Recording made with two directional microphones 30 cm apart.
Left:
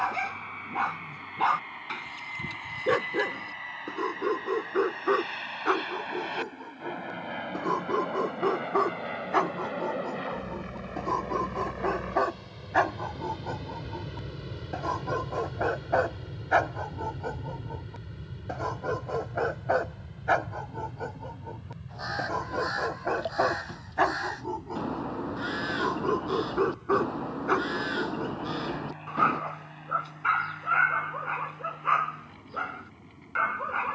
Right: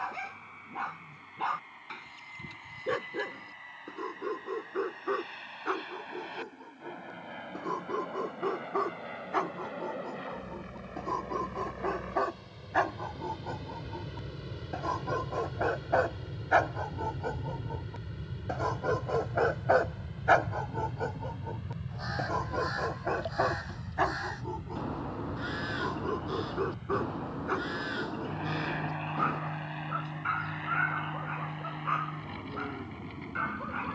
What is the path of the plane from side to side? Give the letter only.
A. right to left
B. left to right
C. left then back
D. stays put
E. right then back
B.